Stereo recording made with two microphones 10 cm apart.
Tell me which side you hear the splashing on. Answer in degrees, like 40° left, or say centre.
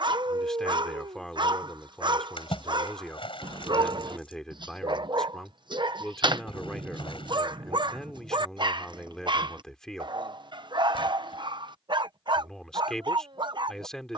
60° left.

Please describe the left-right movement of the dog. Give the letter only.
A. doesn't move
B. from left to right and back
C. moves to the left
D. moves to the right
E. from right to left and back
A.